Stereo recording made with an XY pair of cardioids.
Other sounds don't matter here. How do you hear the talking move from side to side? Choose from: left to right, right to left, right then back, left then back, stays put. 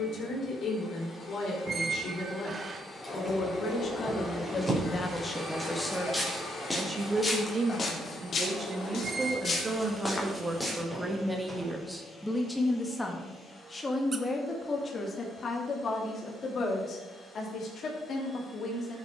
right then back.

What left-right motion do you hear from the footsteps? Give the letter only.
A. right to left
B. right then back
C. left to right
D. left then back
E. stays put
D.